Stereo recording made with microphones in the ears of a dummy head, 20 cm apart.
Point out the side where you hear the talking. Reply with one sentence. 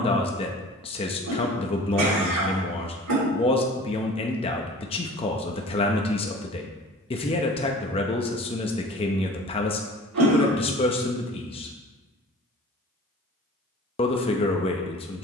In this clip you hear the talking on the left.